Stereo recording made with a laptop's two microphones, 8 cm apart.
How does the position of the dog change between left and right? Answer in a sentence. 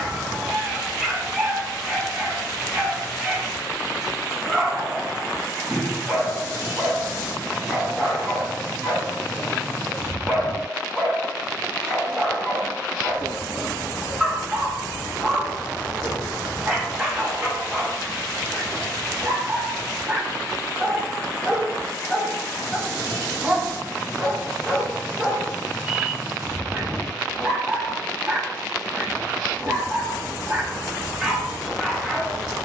In this clip you hear the dog stay in one place.